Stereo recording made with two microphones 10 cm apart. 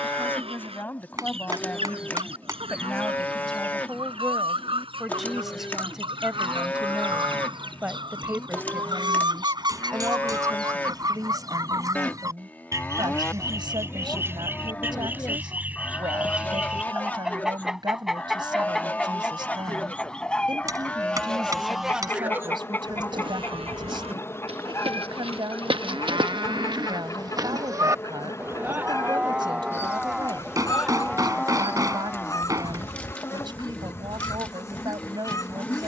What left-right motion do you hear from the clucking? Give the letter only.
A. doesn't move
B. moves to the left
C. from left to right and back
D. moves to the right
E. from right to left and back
B.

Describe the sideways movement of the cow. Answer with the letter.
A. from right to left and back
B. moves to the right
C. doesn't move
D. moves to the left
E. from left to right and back
E.